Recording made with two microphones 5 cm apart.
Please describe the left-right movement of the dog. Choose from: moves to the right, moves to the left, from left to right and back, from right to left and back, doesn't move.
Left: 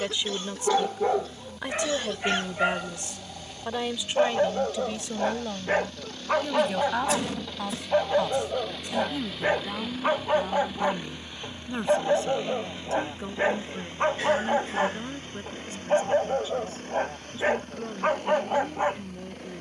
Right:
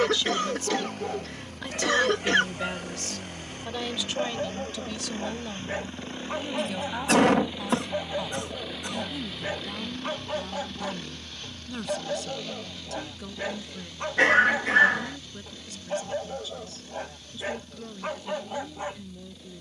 doesn't move.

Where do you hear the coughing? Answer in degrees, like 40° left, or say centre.
80° right.